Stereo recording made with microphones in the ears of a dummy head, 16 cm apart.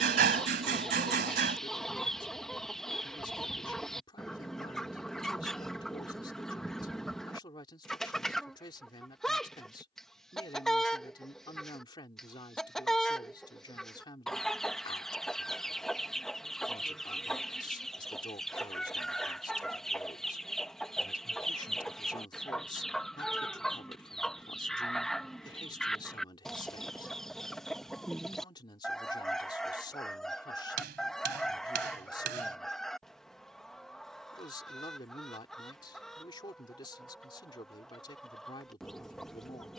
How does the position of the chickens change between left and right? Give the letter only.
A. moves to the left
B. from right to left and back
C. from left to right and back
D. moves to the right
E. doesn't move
E.